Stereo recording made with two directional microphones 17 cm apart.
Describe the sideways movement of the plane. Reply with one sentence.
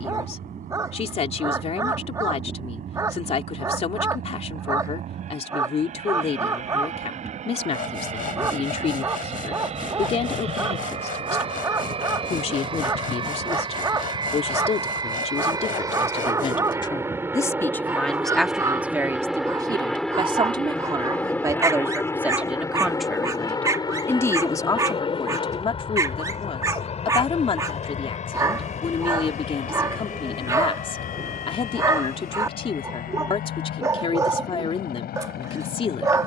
In this clip you hear the plane go from the right side to the left.